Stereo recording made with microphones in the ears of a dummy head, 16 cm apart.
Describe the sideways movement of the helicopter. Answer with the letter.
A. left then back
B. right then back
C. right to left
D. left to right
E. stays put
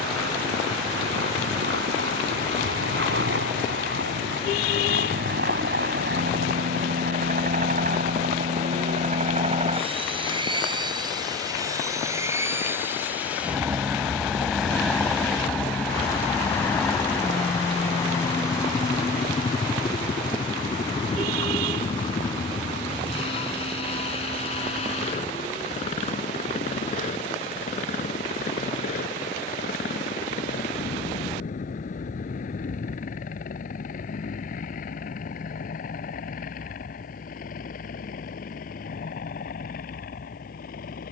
C.